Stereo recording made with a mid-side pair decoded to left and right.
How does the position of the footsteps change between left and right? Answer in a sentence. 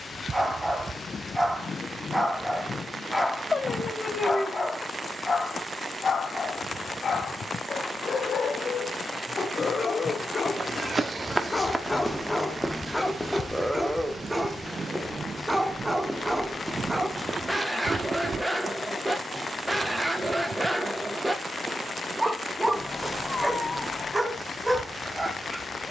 You can hear the footsteps go left and come back.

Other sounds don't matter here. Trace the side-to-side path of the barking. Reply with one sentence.
In this clip you hear the barking go left and come back.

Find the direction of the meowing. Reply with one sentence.
In this clip you hear the meowing on the left.